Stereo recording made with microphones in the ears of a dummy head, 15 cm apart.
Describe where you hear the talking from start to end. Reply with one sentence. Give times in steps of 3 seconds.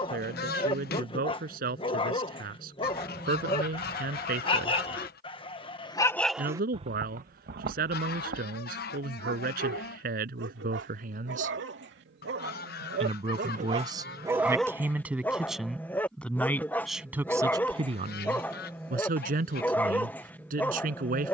In this clip you hear the talking on the right from 0 s, in the centre from 15 s and on the right from 18 s.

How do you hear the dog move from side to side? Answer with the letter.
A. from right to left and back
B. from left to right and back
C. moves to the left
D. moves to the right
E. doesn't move
B.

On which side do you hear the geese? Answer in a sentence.
You can hear the geese on the left.